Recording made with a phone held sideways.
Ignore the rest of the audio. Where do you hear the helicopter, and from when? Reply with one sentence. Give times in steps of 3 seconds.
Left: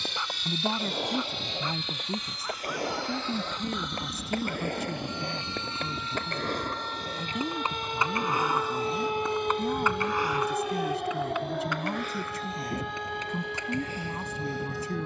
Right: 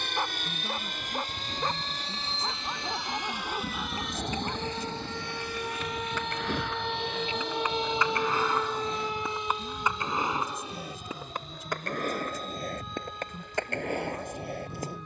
In this clip you hear the helicopter on the right from 0 s, in the centre from 3 s and on the left from 6 s.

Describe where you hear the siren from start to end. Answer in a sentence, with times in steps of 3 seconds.
You can hear the siren on the right from 0 s and on the left from 9 s.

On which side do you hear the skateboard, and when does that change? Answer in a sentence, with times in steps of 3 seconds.
You can hear the skateboard on the left from 0 s and on the right from 9 s.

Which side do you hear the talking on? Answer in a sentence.
In this clip you hear the talking on the left.